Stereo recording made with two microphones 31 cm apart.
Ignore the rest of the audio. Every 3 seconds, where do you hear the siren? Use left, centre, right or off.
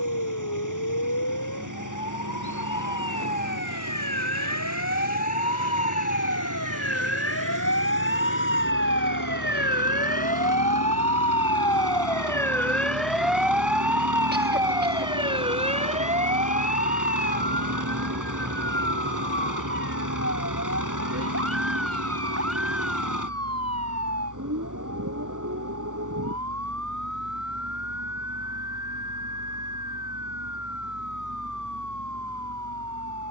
left, left, left, left, centre, right, right, right, right, right, right.